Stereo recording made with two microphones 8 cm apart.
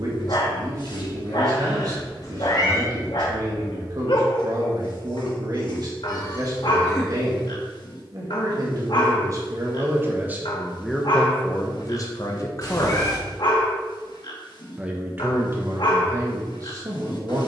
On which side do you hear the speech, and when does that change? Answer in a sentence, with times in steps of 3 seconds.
In this clip you hear the speech on the right from 0 s, in the centre from 9 s, on the left from 12 s and on the right from 15 s.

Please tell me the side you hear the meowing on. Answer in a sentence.
In this clip you hear the meowing on the left.